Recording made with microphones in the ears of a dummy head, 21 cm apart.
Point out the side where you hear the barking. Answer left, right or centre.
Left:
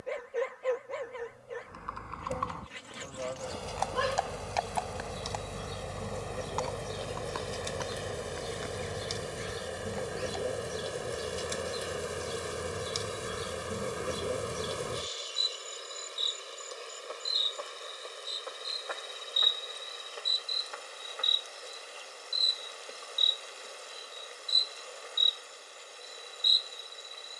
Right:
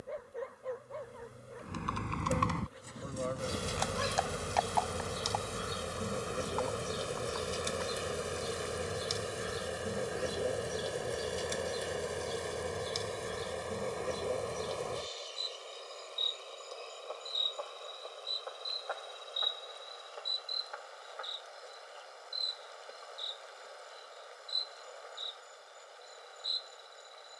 left.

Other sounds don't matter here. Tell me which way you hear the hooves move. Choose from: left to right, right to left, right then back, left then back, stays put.
right to left.